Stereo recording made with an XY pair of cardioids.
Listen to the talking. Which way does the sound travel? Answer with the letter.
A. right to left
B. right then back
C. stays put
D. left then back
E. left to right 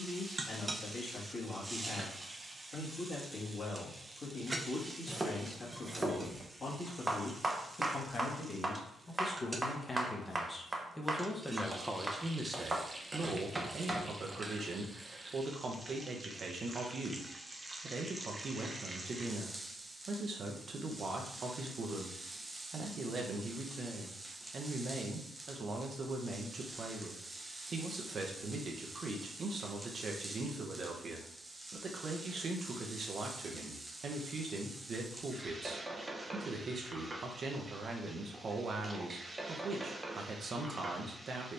E.